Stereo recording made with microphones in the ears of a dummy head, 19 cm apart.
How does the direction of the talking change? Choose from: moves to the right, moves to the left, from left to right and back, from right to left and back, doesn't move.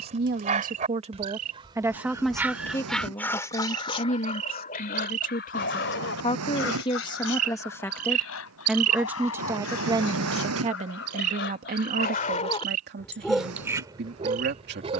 from right to left and back.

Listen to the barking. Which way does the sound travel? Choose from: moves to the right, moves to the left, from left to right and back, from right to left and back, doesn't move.
from right to left and back.